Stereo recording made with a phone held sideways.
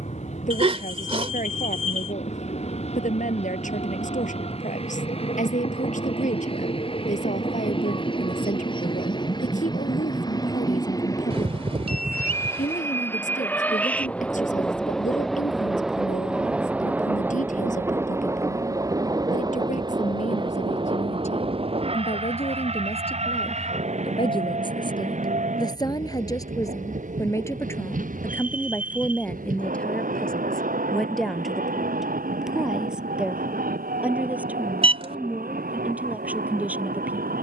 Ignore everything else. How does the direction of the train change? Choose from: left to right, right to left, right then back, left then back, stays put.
left to right.